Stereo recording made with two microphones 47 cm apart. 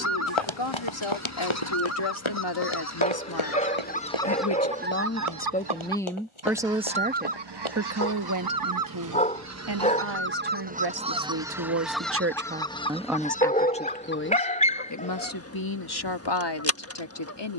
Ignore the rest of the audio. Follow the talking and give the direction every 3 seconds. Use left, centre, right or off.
left, left, right, right, centre, left.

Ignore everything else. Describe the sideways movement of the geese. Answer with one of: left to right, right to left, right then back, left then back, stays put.
right then back.